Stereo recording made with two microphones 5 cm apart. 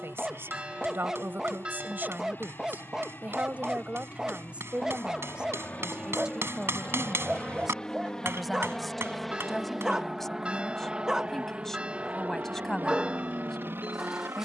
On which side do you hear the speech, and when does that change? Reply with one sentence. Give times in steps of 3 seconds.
In this clip you hear the speech on the right from 0 s and in the centre from 6 s.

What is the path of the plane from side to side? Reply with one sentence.
In this clip you hear the plane move to the right.